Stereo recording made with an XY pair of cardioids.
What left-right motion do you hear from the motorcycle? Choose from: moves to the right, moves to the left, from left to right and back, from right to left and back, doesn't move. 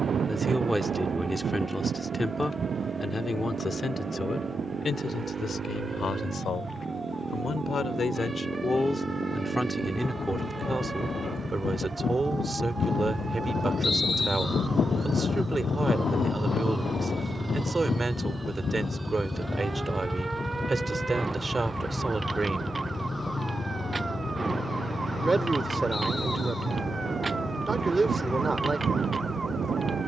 moves to the left.